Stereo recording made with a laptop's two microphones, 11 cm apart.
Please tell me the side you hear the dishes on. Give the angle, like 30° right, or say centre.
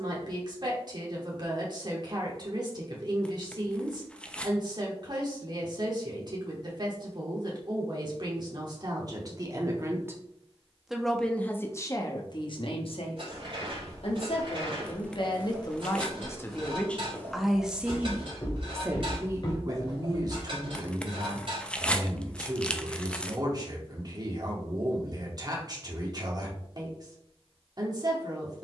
50° right.